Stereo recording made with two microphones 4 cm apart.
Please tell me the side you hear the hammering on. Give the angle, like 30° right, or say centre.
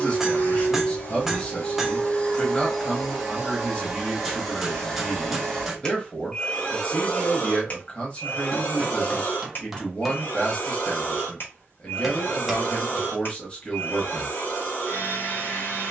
10° right.